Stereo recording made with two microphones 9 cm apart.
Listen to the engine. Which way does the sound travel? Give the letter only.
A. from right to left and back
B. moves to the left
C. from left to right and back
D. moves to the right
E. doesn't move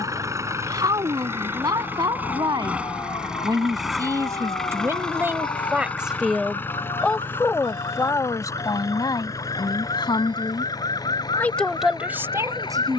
B.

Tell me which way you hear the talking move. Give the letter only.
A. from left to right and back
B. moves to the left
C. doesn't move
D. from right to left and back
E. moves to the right
D.